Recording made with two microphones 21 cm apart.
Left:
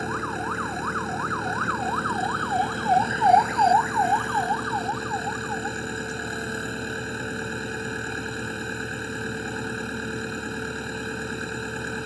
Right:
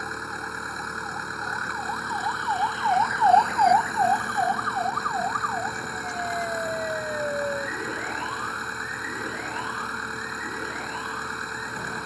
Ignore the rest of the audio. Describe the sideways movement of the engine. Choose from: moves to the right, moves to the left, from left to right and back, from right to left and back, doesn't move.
doesn't move.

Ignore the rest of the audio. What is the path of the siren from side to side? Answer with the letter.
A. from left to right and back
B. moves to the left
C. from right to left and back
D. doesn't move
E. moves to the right
E.